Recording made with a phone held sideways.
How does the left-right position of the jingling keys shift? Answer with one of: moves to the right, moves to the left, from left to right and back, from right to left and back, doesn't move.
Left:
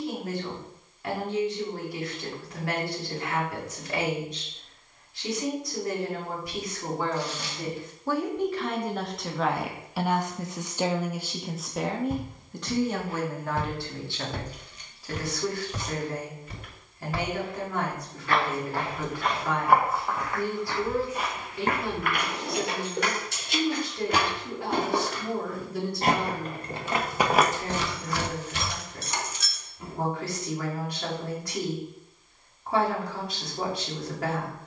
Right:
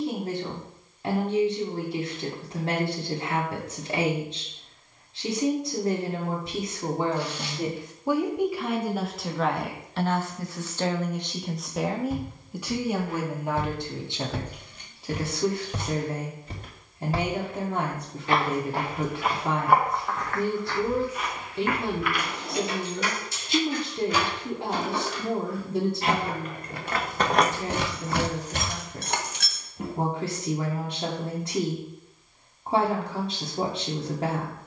moves to the right.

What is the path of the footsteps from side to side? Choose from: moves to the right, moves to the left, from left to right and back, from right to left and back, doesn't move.
from left to right and back.